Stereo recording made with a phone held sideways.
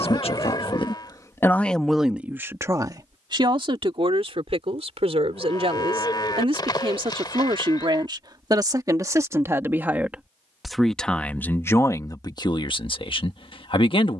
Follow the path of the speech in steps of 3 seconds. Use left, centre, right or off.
centre, right, right, centre, left.